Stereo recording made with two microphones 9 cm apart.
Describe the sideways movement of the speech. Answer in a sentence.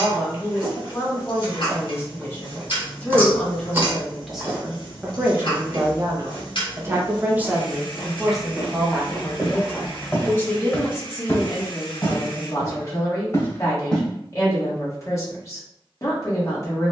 You can hear the speech move from left to right and back again.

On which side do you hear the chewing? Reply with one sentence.
You can hear the chewing on the right.